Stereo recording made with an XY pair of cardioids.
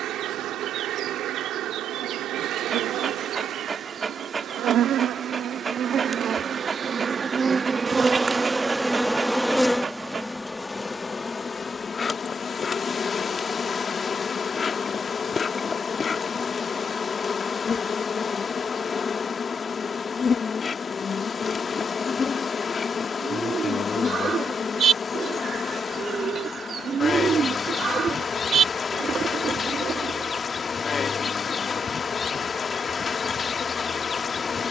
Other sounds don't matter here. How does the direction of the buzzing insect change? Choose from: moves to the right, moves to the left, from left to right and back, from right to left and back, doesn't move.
moves to the left.